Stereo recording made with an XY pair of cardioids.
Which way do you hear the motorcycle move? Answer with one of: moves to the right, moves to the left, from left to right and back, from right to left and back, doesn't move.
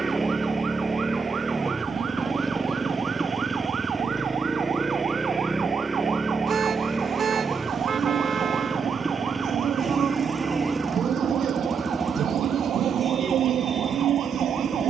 doesn't move.